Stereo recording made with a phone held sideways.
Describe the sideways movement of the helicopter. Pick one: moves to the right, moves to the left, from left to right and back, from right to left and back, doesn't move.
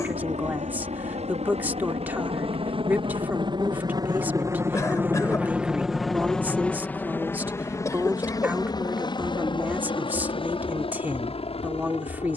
moves to the left.